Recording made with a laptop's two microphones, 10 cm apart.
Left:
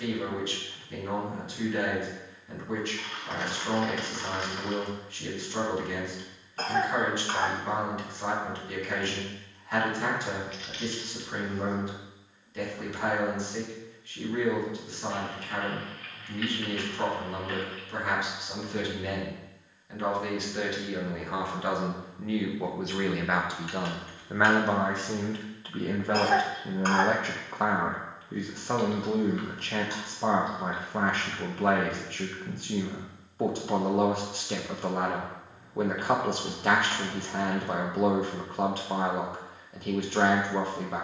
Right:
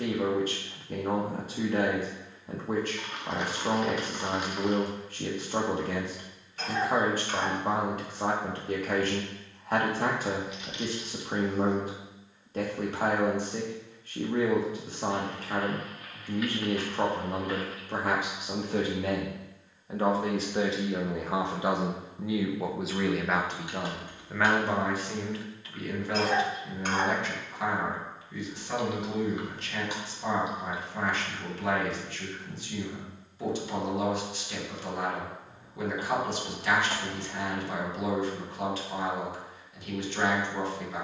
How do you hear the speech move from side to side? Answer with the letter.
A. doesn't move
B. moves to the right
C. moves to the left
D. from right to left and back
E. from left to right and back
C.